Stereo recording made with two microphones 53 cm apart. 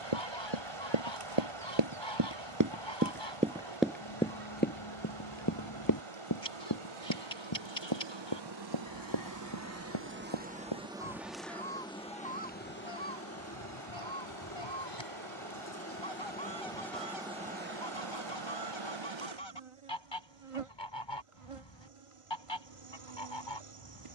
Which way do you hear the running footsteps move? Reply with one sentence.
You can hear the running footsteps go from the right side to the left.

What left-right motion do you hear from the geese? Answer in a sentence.
In this clip you hear the geese stay in one place.